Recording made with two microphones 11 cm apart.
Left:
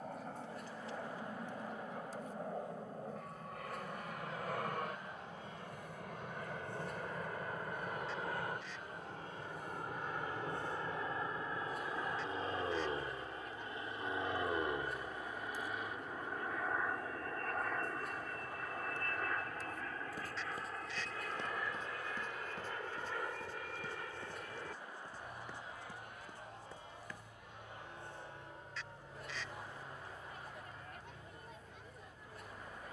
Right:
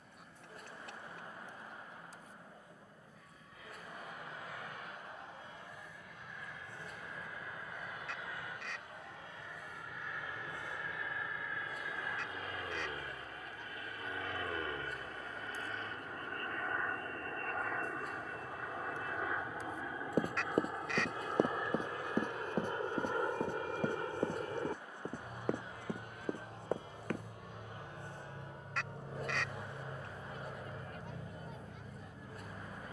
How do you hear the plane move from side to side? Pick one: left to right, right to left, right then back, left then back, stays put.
left to right.